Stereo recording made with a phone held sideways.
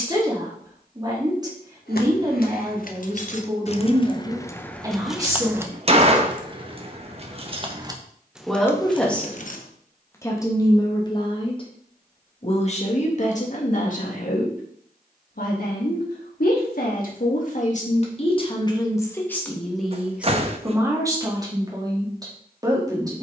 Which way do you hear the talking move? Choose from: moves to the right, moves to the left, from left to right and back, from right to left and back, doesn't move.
from right to left and back.